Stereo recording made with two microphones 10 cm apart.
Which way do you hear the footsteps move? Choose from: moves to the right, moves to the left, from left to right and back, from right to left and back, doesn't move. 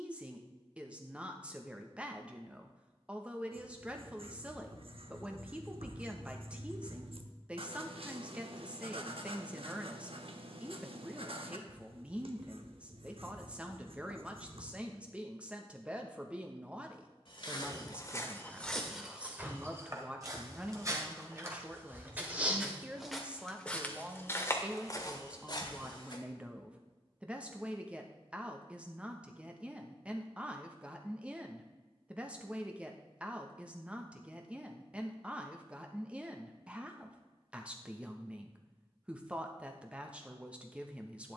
from left to right and back.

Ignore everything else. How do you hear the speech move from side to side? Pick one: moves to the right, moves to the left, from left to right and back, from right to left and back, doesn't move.
doesn't move.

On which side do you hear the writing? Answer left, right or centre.
right.